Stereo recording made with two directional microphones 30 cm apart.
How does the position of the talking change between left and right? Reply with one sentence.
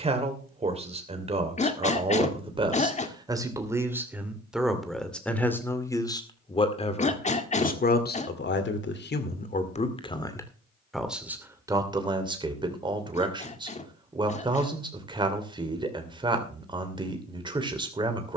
You can hear the talking move from right to left and back again.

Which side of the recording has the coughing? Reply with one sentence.
In this clip you hear the coughing on the left.